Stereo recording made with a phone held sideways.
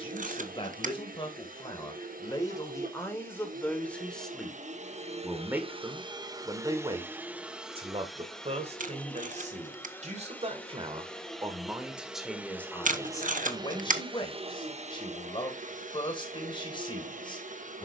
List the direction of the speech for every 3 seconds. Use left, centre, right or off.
left, centre, right, right, left, left.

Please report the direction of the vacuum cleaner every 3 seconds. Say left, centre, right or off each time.
right, right, centre, centre, right, right.